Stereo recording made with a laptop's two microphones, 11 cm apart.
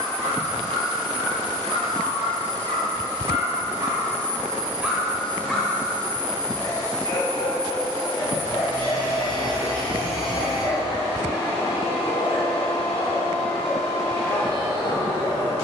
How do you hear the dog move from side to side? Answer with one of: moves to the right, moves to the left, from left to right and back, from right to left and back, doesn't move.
moves to the left.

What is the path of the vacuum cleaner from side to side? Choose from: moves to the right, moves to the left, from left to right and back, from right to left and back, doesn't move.
doesn't move.